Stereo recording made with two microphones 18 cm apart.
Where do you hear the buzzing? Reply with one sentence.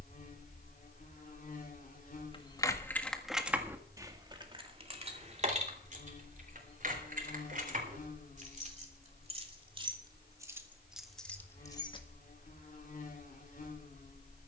You can hear the buzzing on the left.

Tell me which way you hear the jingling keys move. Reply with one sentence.
You can hear the jingling keys move from left to right and back again.